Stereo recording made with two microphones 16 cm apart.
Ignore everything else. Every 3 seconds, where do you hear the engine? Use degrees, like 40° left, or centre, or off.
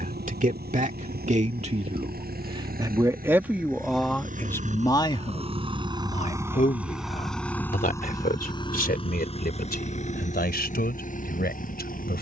70° right, 50° right, 10° left, 50° left.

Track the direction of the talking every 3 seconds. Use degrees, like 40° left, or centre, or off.
40° right, 10° left, 60° left, 70° left.